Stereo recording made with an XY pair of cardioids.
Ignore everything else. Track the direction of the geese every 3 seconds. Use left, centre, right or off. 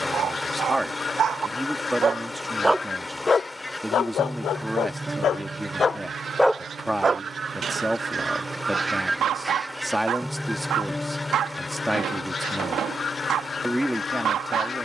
left, centre, right, centre, left.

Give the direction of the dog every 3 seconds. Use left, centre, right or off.
right, left, right, right, right.